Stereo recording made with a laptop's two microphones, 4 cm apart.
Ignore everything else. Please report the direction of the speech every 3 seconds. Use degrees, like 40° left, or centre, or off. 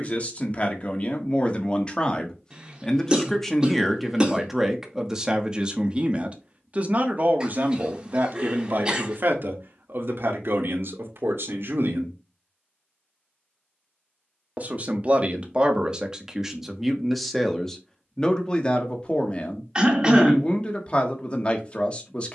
30° left, 10° right, 50° right, 60° right, 40° right, 10° right, 20° left, 30° left.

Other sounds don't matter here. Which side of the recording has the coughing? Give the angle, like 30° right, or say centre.
20° right.